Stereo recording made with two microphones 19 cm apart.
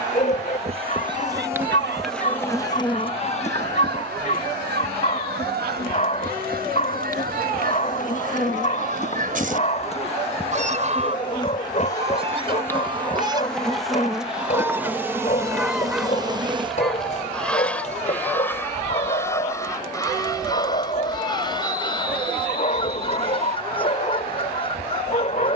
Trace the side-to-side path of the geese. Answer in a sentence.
You can hear the geese travel towards the left.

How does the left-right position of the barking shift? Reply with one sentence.
In this clip you hear the barking stay in one place.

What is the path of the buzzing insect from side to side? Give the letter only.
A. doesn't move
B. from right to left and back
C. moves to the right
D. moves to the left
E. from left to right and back
B.